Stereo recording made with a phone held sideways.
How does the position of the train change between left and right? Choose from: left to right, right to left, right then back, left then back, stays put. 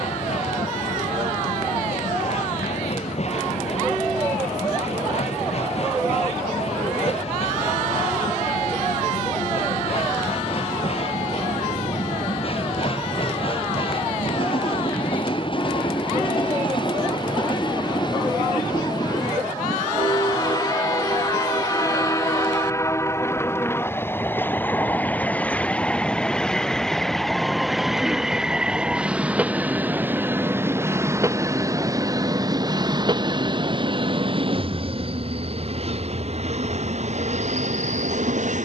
left to right.